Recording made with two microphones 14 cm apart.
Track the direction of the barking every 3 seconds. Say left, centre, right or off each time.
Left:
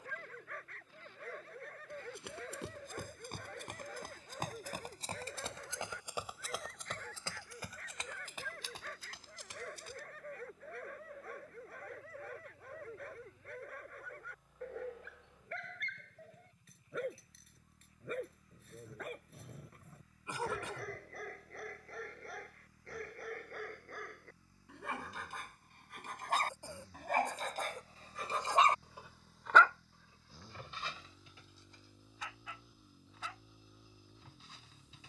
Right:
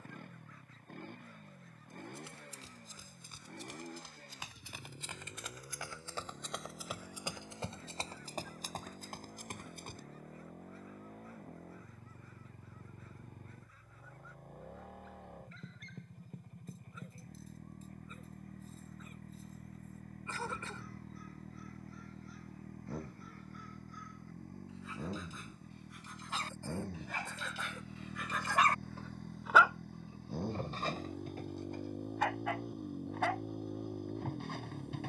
left, left, left, left, left, left, left, left, left, left, right, right.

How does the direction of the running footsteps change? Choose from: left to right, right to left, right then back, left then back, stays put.
left to right.